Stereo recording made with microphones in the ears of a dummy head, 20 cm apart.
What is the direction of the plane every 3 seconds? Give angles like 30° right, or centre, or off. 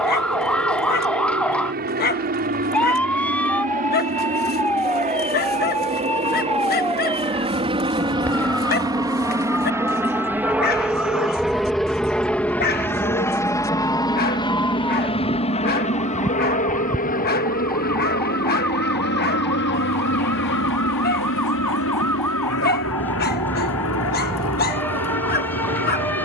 50° right, 40° right, 30° right, 10° right, 10° left, 30° left, 50° left, 60° left, 70° left.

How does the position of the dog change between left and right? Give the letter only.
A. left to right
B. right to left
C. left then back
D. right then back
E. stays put
E.